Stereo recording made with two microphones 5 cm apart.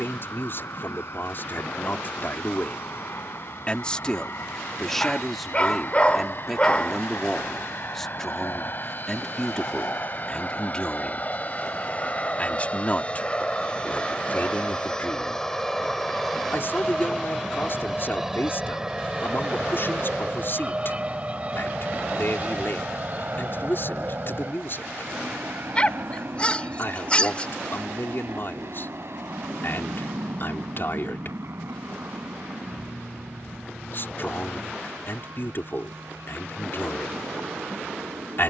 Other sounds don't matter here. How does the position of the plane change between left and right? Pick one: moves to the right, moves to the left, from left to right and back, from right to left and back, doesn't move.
moves to the right.